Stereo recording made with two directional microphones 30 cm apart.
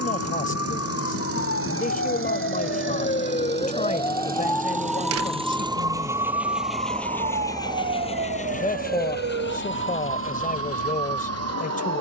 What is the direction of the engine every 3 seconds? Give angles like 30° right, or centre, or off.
50° right, 30° right, 10° left, 50° left.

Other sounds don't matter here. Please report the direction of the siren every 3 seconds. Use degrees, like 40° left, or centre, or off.
50° left, 10° left, 30° right, 50° right.